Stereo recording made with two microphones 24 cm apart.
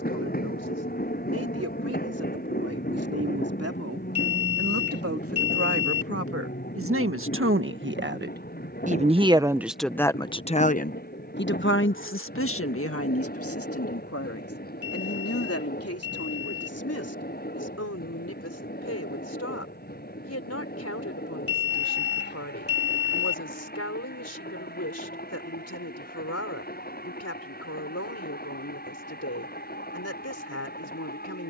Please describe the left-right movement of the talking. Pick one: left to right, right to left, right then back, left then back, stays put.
right to left.